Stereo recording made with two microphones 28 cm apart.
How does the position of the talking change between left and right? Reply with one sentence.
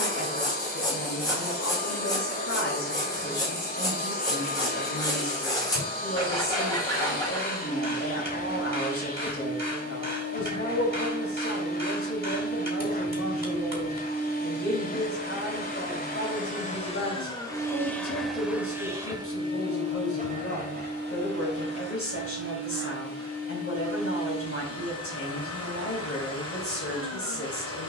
You can hear the talking stay put.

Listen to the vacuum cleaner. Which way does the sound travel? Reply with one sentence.
You can hear the vacuum cleaner go from the left side to the right.